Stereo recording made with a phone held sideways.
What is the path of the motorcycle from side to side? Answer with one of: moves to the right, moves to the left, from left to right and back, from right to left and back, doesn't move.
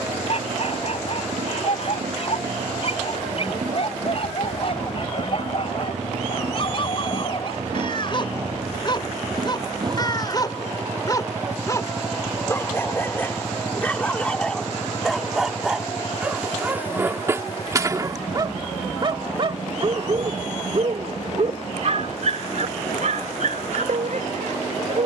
moves to the left.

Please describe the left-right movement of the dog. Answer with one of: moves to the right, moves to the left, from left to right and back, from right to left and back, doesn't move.
moves to the right.